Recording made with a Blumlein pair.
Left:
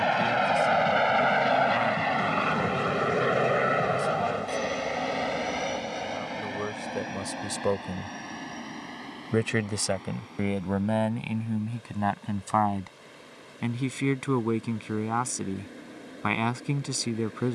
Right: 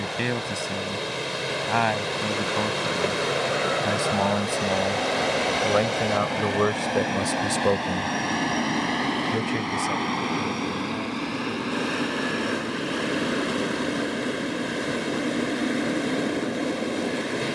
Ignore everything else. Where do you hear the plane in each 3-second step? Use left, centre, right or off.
left, centre, right, right, right, right.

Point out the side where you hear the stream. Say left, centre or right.
right.